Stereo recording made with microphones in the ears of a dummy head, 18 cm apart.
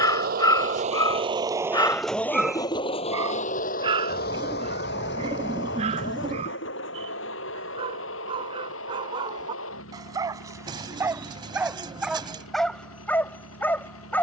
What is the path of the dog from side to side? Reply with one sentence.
In this clip you hear the dog go right and come back.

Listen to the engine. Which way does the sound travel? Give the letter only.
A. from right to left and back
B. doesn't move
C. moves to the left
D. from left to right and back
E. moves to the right
C.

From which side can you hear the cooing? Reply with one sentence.
You can hear the cooing on the right.